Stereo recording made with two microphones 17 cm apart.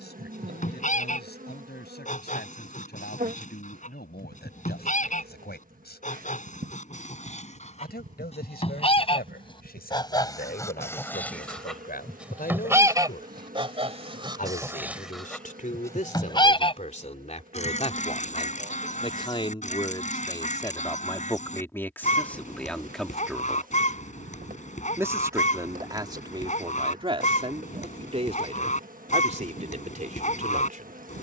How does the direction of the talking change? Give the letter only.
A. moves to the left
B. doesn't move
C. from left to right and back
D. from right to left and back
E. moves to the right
E.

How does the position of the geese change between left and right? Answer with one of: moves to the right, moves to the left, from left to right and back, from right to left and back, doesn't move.
from left to right and back.